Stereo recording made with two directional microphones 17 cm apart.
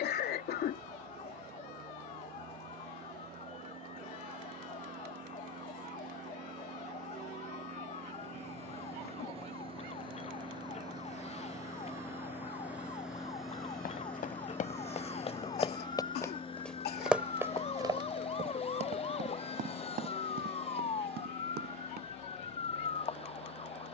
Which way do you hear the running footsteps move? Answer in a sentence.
You can hear the running footsteps move from left to right.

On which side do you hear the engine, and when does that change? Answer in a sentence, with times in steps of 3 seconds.
You can hear the engine on the right from 0 s, in the centre from 12 s and on the left from 15 s.